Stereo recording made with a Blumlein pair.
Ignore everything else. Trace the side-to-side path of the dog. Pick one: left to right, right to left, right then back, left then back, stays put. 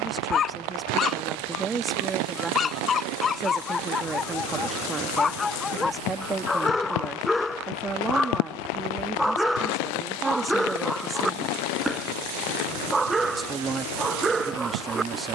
left to right.